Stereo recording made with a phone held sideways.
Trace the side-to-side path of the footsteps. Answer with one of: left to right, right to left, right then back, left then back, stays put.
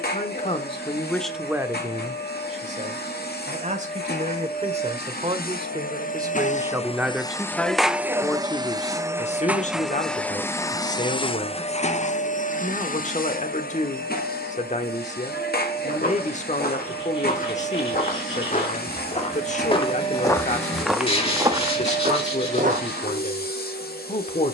left to right.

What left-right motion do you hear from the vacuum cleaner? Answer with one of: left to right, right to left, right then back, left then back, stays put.
right then back.